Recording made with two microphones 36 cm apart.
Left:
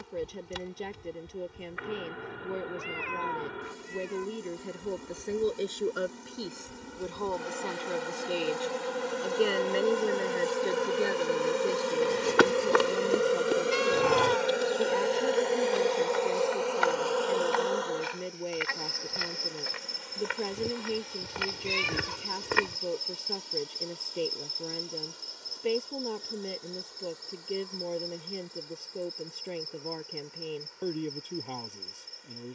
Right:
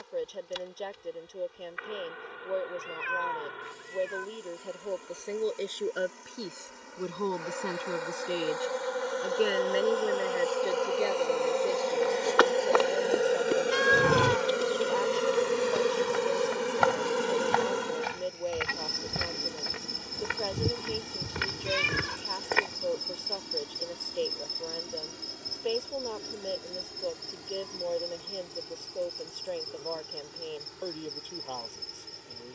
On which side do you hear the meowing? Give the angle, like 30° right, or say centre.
30° right.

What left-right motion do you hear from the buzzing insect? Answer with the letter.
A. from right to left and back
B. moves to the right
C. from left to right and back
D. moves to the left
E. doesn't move
B.